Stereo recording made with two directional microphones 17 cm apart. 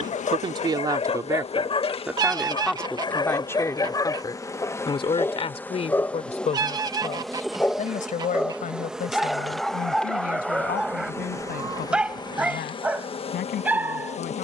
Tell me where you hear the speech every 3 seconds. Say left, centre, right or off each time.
centre, left, left, left, left.